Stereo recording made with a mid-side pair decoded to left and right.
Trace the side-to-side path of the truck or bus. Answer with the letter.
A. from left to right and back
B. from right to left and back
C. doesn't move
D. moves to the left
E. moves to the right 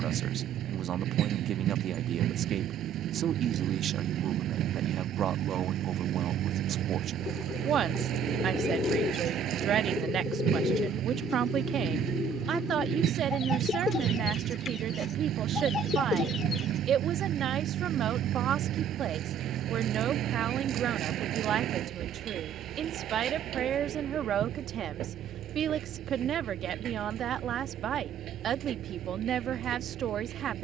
C.